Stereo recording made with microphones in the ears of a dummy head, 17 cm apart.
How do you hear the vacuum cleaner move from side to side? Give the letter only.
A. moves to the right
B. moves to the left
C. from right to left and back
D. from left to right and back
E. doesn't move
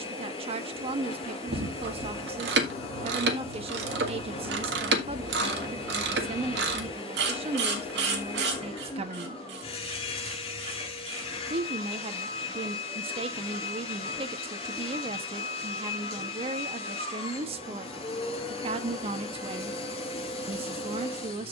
E.